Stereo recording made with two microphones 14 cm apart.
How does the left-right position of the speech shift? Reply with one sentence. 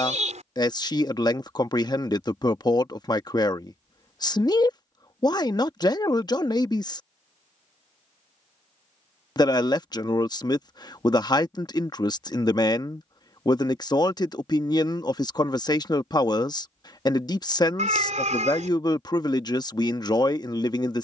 You can hear the speech stay put.